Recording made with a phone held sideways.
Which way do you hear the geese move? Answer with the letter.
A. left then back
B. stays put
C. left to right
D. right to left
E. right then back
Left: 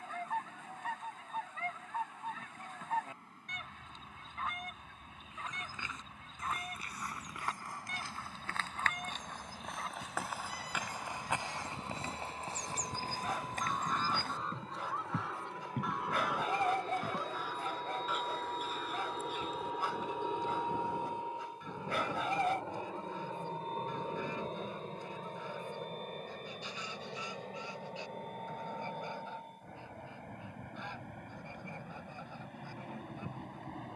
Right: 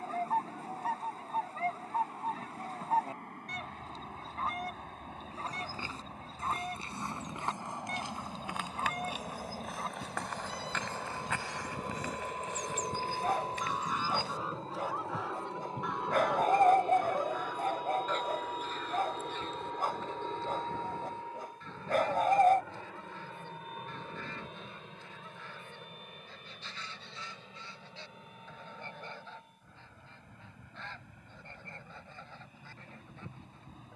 D.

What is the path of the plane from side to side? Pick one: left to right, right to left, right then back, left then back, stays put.
right to left.